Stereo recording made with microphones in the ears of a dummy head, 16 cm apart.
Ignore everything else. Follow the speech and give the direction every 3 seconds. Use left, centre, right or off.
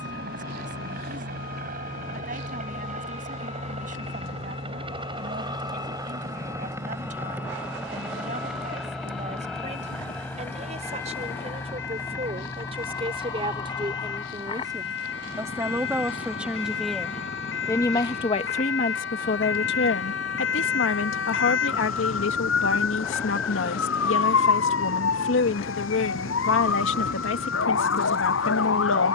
right, right, right, right, right, centre, left, left, left, left.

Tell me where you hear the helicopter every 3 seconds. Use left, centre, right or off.
right, right, centre, centre, left, left, left, left, left, left.